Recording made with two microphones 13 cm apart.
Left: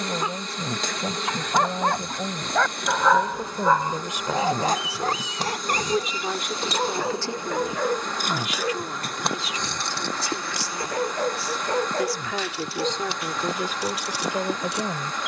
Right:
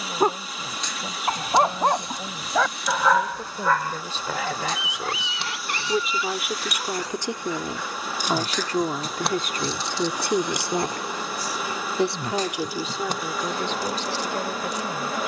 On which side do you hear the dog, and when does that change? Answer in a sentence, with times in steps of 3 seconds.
You can hear the dog on the right from 0 s and on the left from 3 s.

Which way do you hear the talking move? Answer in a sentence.
You can hear the talking move from left to right and back again.